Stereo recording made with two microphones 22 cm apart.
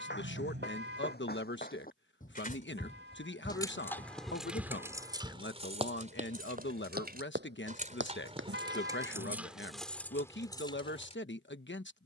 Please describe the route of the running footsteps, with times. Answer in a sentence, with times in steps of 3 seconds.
You can hear the running footsteps on the left from 0 s, in the centre from 3 s, on the right from 6 s and not at all from 9 s.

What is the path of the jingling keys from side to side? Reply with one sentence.
You can hear the jingling keys move from left to right and back again.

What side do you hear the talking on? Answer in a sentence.
In this clip you hear the talking on the left.